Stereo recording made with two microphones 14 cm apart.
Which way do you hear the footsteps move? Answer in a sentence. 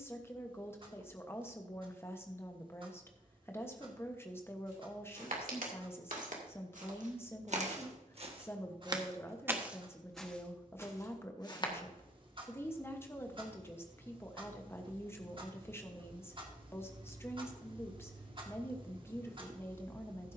In this clip you hear the footsteps go from the right side to the left.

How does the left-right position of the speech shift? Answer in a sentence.
You can hear the speech stay put.